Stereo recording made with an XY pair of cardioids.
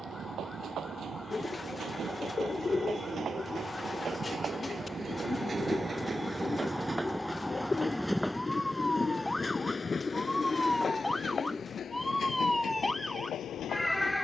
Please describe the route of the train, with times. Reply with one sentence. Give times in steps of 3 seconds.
You can hear the train on the right from 0 s, in the centre from 6 s and on the left from 9 s.